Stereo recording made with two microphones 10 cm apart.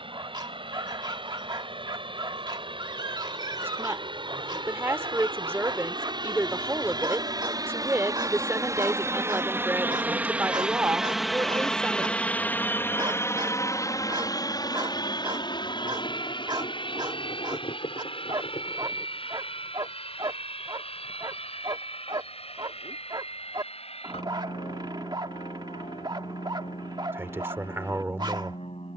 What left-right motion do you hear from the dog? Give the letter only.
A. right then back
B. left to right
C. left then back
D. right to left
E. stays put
E.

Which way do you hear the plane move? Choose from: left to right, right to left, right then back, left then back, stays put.
right to left.